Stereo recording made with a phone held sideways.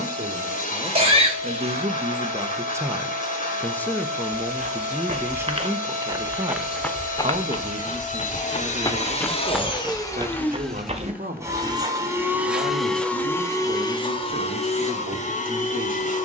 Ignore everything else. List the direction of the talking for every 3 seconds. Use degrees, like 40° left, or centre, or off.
50° right, centre, 50° right, 70° right, 70° right, 70° right.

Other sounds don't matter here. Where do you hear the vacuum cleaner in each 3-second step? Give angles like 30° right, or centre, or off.
60° left, 60° left, 60° left, 10° left, 20° left, 50° left.